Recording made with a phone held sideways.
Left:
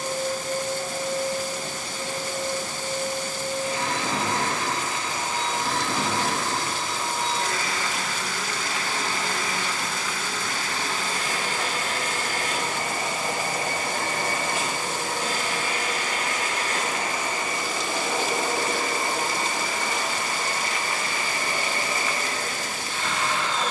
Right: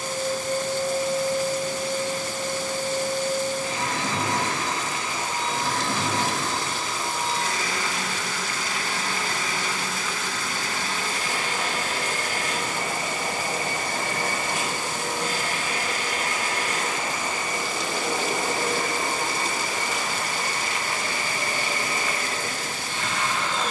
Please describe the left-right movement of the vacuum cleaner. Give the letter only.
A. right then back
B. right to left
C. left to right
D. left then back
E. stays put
E.